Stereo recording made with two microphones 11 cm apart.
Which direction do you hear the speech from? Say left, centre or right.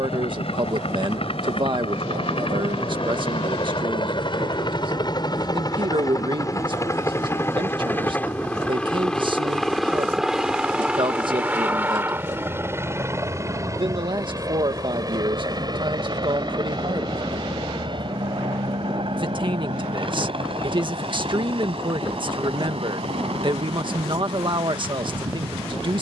right.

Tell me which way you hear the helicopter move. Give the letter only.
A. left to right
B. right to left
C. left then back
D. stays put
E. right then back
A.